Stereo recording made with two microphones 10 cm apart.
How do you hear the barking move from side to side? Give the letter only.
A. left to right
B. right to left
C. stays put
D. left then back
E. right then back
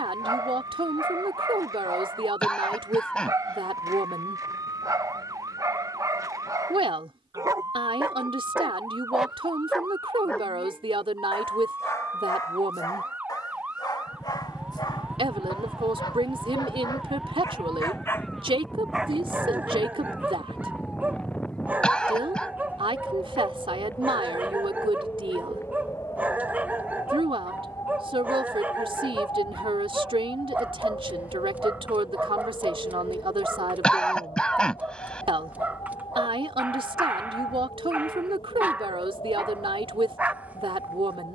D.